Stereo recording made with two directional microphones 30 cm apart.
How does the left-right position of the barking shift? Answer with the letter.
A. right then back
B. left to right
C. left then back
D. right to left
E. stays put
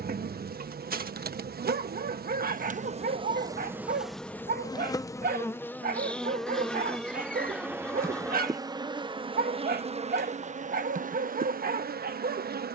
E.